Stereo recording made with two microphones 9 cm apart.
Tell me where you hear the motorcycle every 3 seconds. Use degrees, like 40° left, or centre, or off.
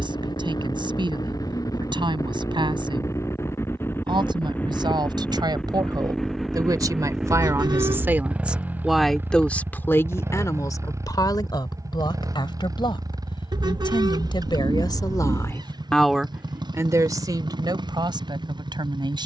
50° left, 20° left, 10° right, 30° right, 40° right, 50° right, 60° right.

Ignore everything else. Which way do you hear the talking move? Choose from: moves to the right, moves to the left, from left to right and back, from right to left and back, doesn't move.
from right to left and back.